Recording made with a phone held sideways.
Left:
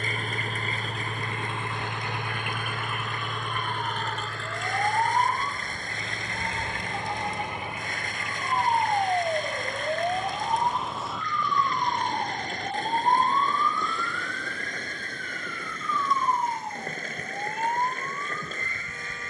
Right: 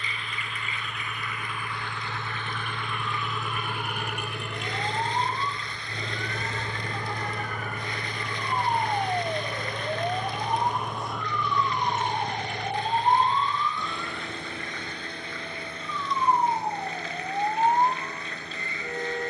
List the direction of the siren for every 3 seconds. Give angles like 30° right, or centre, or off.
50° left, 40° left, 30° left, 10° left, 20° right, 40° right, 50° right.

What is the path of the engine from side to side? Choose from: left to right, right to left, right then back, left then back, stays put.
left to right.